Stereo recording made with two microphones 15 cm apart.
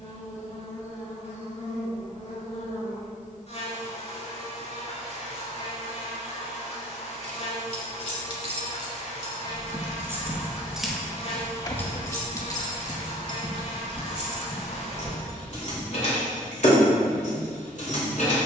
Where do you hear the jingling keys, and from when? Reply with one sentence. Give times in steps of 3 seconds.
You can hear the jingling keys not at all from 0 s, on the right from 6 s, in the centre from 9 s and on the left from 12 s.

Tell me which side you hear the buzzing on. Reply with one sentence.
In this clip you hear the buzzing on the left.